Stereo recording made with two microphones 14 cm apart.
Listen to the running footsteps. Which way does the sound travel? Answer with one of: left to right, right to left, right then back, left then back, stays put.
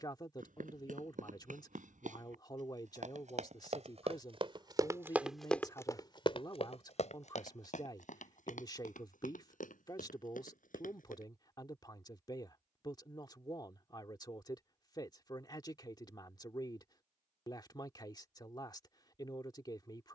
right to left.